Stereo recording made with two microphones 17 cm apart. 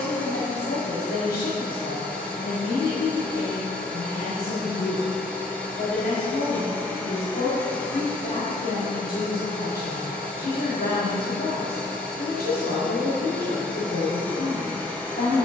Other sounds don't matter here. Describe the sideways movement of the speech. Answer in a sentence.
In this clip you hear the speech stay put.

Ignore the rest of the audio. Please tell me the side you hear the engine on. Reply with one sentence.
You can hear the engine in the centre.